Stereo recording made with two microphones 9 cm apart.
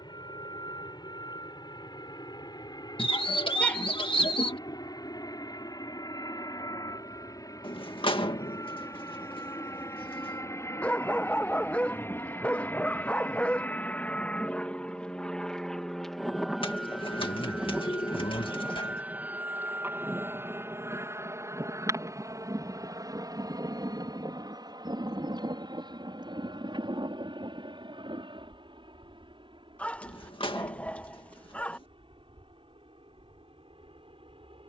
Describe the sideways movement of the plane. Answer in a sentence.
In this clip you hear the plane travel towards the right.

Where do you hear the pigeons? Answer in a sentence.
In this clip you hear the pigeons on the left.